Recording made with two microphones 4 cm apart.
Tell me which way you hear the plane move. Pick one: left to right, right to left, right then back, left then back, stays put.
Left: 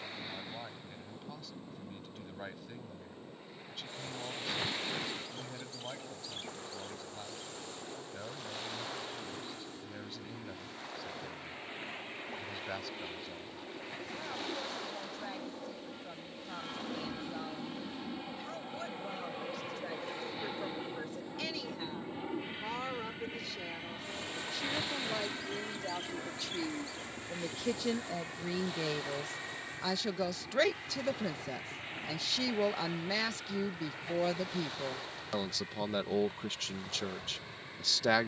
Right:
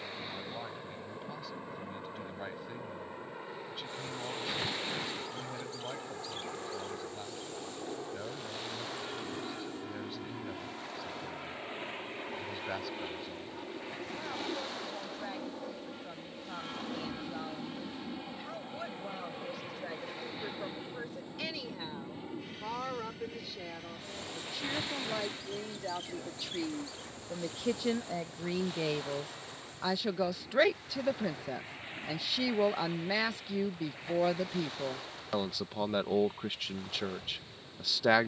right to left.